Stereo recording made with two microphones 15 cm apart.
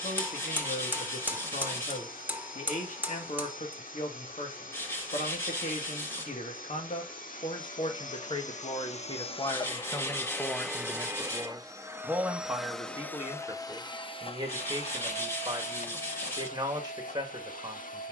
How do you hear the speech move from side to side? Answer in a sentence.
You can hear the speech move to the right.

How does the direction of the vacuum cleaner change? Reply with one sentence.
In this clip you hear the vacuum cleaner move from left to right and back again.